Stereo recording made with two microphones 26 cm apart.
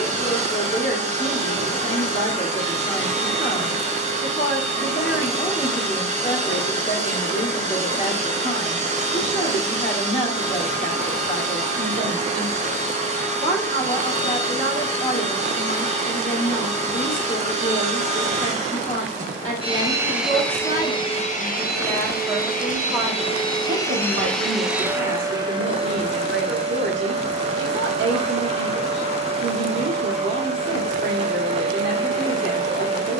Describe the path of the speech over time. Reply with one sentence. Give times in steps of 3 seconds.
You can hear the speech on the left from 0 s, in the centre from 21 s and on the right from 24 s.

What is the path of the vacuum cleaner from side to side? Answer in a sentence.
You can hear the vacuum cleaner move from right to left and back again.